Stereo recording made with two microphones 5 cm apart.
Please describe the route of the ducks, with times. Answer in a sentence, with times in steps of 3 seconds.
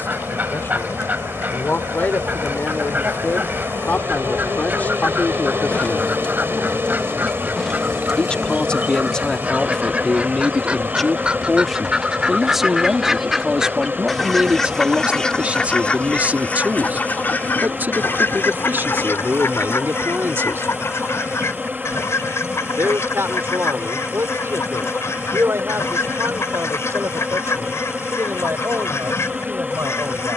In this clip you hear the ducks on the right from 0 s, in the centre from 12 s and on the left from 15 s.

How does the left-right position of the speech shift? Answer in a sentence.
You can hear the speech move to the right.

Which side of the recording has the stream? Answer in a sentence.
In this clip you hear the stream on the right.